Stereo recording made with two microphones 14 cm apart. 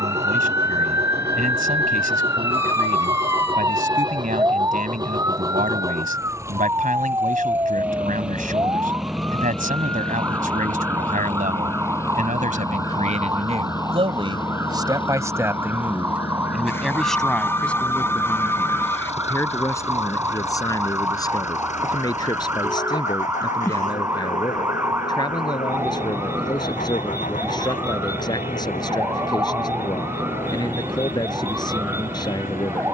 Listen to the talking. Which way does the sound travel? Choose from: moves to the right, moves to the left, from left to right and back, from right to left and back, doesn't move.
moves to the left.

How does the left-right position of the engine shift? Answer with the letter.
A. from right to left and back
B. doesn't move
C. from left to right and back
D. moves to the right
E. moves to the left
E.